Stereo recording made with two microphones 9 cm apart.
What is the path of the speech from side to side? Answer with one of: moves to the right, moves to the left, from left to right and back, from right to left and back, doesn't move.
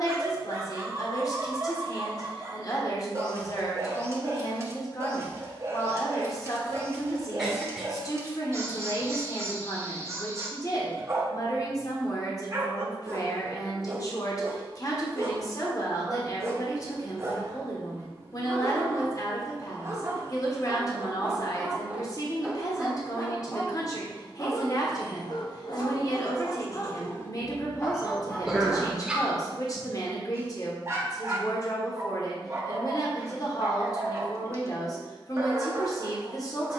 doesn't move.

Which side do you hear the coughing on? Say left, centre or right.
centre.